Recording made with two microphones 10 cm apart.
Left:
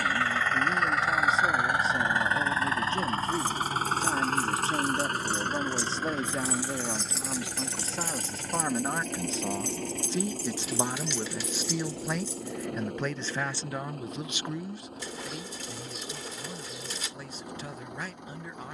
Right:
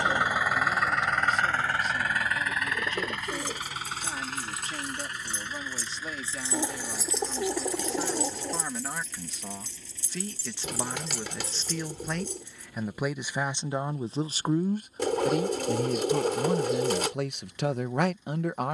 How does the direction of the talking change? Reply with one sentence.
In this clip you hear the talking move from left to right.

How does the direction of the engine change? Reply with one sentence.
You can hear the engine travel towards the left.